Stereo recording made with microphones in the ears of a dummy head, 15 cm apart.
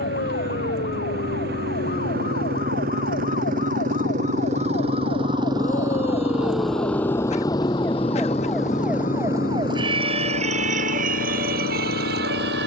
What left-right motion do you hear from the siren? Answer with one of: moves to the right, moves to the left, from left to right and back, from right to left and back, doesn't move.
moves to the right.